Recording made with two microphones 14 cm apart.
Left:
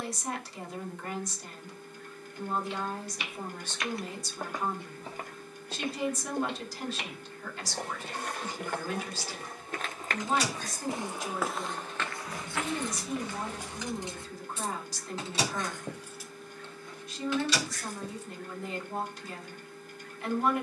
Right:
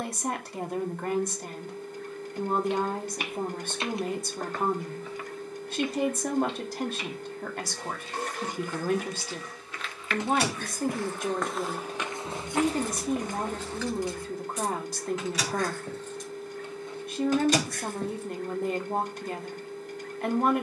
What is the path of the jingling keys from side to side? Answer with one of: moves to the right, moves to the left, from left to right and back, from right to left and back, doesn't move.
from right to left and back.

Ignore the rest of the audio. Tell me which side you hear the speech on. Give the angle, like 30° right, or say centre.
60° right.